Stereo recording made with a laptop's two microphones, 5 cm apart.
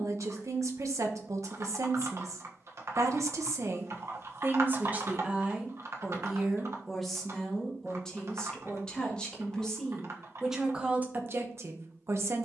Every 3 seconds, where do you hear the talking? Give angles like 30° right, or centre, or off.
70° right, 40° right, 10° left, 10° right.